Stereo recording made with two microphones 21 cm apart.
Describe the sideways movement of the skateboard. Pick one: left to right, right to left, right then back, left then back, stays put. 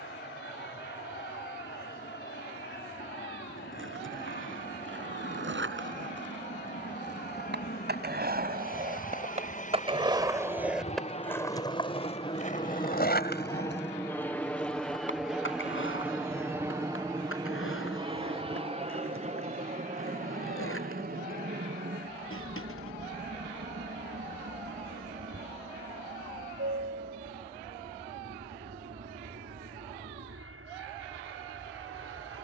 right to left.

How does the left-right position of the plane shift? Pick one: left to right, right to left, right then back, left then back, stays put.
left to right.